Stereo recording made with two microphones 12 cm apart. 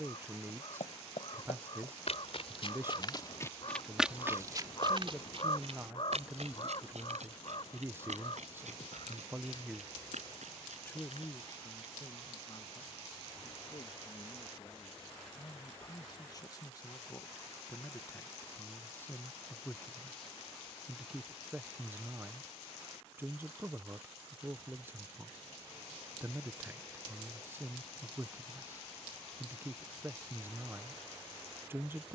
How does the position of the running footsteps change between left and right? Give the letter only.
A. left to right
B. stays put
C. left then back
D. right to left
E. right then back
A.